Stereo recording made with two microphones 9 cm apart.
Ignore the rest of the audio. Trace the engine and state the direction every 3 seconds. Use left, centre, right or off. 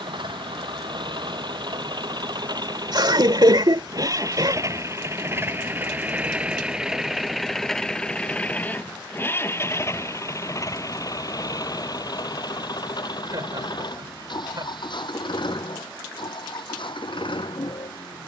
right, right, centre, left, left, left.